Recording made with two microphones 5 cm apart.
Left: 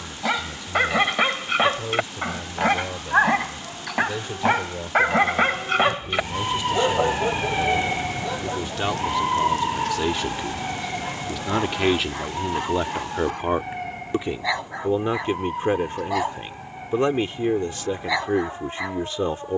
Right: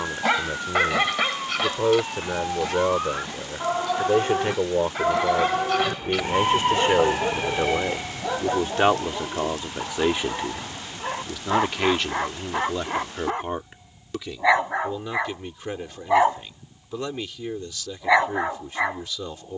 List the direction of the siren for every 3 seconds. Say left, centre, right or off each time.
right, right, centre, left, left, left, left.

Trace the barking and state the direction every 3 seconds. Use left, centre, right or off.
left, left, centre, right, right, right, right.